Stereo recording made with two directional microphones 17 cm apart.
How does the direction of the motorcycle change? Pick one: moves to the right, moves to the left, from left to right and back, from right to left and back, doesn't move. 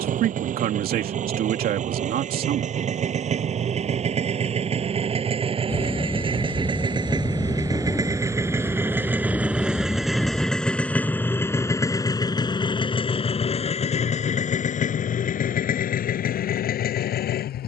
moves to the left.